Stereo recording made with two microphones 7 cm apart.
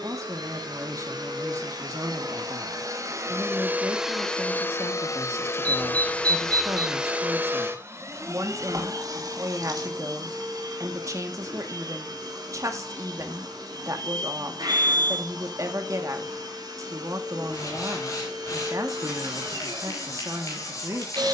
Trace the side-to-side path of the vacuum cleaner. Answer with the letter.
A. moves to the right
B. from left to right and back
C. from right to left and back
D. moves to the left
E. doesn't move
C.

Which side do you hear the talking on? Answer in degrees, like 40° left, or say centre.
50° right.